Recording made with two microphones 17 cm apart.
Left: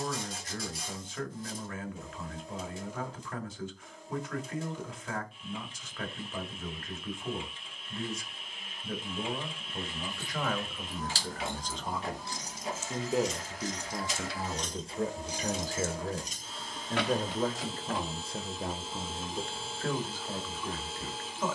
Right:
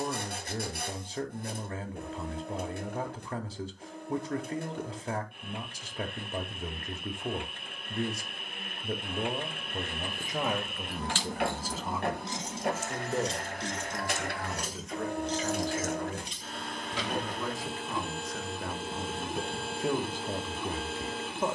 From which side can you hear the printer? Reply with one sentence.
You can hear the printer on the right.